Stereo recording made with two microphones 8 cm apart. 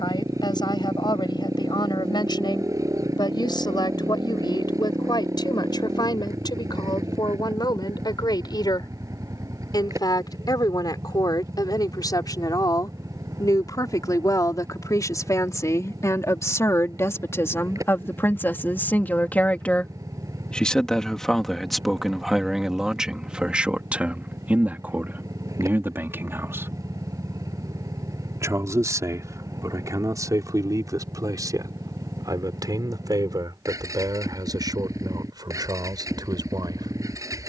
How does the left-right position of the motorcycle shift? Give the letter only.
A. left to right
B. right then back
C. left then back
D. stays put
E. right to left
D.